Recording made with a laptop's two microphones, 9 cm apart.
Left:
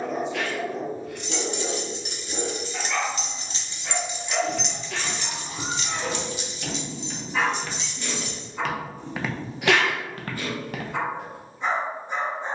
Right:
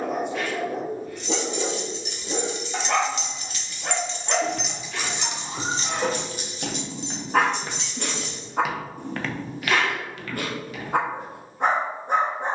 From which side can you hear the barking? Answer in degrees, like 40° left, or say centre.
50° right.